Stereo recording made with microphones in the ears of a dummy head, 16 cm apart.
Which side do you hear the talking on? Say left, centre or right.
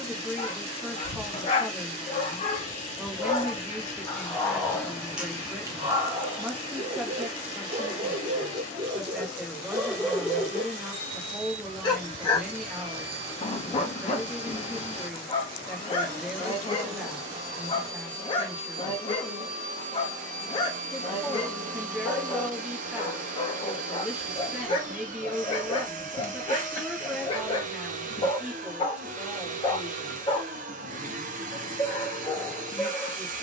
centre.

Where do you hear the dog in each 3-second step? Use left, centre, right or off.
left, centre, right, centre, left, left, left, left, left, left, left.